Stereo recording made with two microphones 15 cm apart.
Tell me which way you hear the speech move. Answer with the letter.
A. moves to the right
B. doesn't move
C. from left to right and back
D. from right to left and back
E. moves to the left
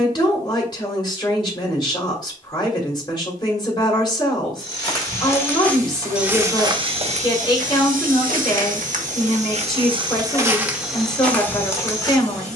B.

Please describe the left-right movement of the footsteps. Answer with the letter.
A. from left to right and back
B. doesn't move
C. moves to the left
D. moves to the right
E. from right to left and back
A.